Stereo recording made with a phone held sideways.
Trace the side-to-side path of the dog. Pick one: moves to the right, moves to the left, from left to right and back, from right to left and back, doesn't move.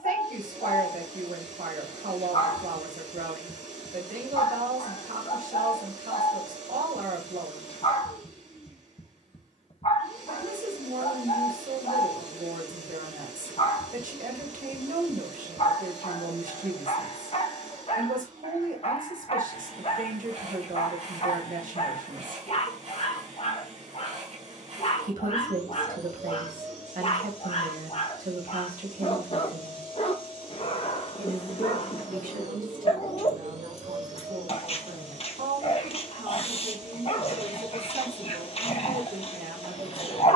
doesn't move.